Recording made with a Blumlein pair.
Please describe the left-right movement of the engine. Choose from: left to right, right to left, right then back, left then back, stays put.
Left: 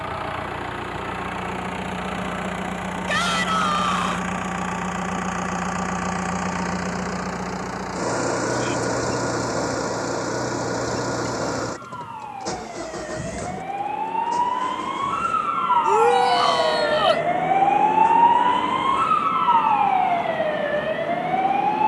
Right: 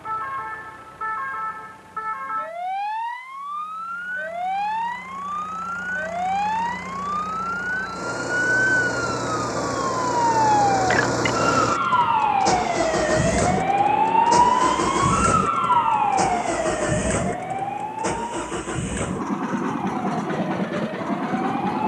left to right.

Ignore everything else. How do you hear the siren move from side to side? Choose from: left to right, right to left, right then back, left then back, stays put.
right to left.